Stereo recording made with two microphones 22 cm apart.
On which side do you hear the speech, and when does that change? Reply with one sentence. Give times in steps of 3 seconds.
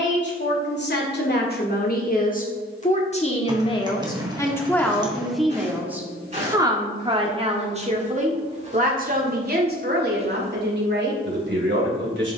In this clip you hear the speech on the left from 0 s, in the centre from 3 s and on the right from 6 s.